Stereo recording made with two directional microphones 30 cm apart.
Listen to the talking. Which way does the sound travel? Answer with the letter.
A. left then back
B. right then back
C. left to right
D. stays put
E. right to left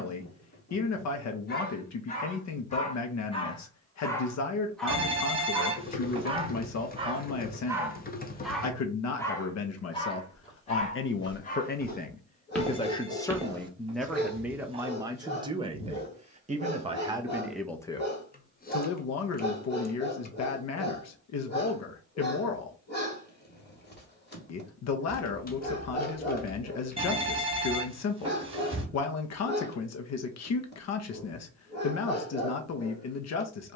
B.